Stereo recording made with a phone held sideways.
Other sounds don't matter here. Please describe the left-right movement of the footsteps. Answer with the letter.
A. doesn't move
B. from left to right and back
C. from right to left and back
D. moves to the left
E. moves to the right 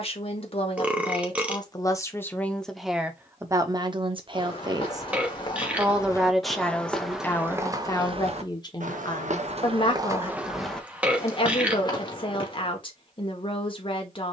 B.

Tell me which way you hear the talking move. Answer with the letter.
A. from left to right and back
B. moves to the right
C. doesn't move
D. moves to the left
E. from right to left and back
A.